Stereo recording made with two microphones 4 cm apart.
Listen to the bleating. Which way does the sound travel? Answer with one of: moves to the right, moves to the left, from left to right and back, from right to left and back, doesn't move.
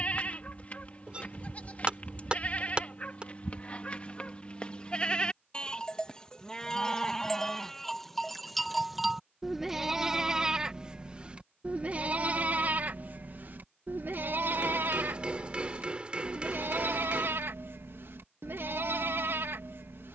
moves to the right.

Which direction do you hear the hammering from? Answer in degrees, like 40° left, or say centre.
20° right.